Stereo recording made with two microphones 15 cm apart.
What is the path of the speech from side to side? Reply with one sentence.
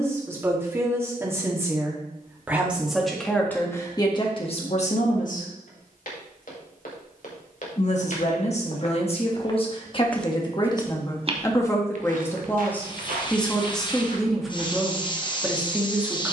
In this clip you hear the speech move from right to left and back again.